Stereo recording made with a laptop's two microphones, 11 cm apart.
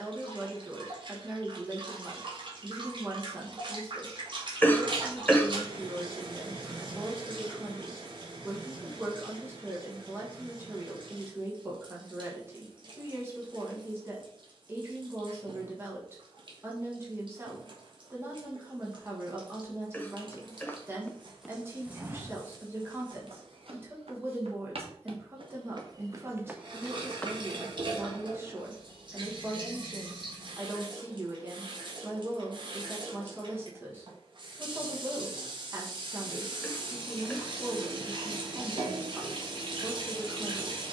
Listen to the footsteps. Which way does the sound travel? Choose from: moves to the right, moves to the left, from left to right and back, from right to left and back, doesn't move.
from left to right and back.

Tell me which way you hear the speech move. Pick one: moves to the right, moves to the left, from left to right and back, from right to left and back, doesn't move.
doesn't move.